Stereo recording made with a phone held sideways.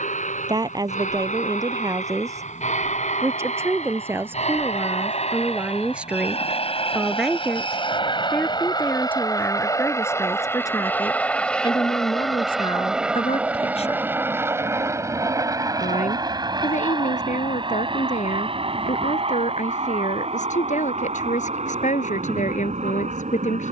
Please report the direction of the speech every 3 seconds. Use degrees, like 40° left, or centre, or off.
20° right, 10° right, centre, 20° left, 40° left, 60° left, 60° left, 60° left.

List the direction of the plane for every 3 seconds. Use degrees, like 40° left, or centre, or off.
70° left, 60° left, 40° left, 20° left, 10° right, 30° right, 40° right, 50° right.